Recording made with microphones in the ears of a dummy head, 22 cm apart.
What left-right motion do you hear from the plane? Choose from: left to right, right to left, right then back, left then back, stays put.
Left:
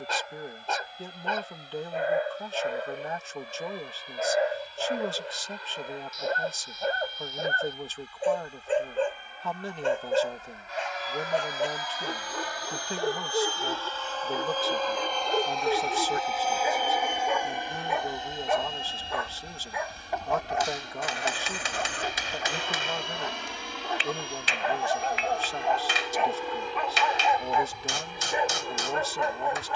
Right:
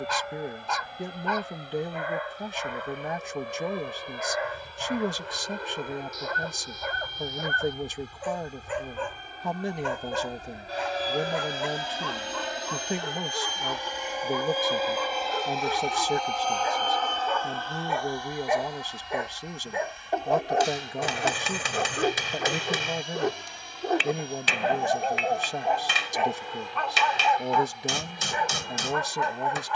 right to left.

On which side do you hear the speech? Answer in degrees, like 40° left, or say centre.
10° right.